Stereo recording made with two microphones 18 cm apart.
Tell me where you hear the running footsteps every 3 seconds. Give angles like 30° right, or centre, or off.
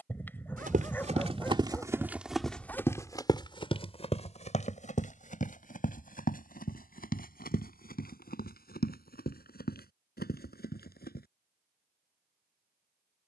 20° right, 40° left, 60° left, 60° left, off.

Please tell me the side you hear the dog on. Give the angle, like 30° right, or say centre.
10° left.